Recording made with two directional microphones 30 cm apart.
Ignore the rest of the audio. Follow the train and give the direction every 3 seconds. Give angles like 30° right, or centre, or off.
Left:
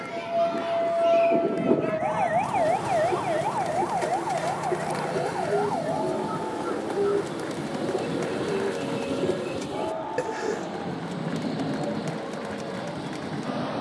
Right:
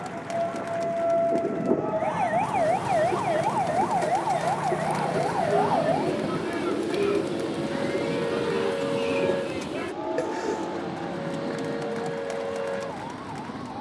40° right, 30° right, 10° right, 20° left, 40° left.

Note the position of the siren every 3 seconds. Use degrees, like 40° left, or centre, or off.
20° left, 20° right, 40° right, 50° right, 60° right.